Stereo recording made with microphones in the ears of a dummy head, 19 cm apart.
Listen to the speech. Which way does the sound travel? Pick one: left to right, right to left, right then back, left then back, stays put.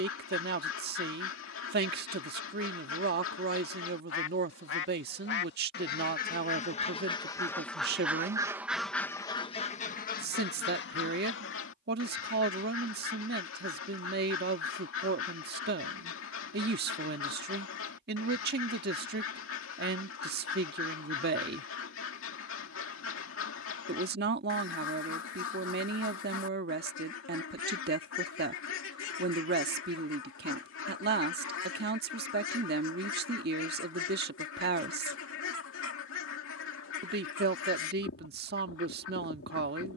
stays put.